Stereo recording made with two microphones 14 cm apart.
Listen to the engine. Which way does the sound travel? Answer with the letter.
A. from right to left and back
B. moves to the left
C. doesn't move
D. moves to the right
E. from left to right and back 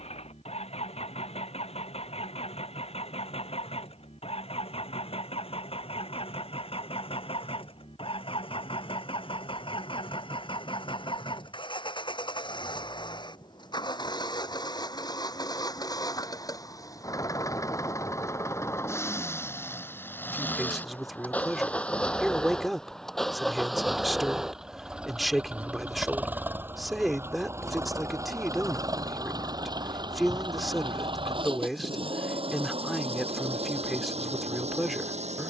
D.